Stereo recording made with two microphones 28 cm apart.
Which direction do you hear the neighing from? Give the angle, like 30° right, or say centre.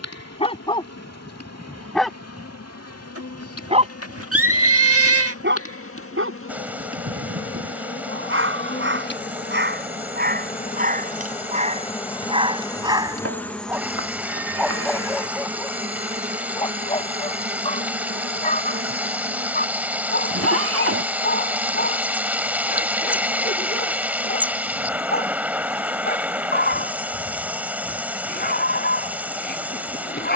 50° right.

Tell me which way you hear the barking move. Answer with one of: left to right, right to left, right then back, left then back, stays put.
right then back.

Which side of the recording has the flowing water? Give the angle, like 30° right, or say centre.
10° right.